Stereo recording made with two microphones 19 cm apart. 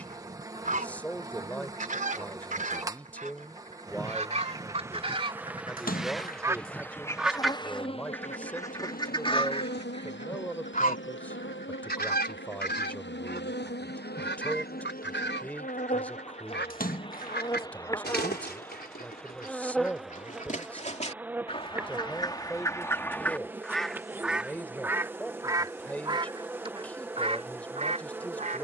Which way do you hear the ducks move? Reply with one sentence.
You can hear the ducks move from right to left and back again.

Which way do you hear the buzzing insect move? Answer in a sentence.
You can hear the buzzing insect move from right to left and back again.